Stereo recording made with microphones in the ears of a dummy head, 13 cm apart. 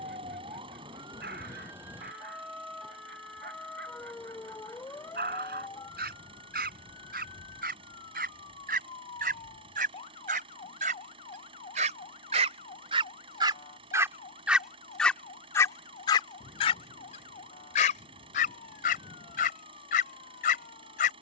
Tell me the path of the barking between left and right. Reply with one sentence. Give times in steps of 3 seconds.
You can hear the barking on the right from 0 s and on the left from 15 s.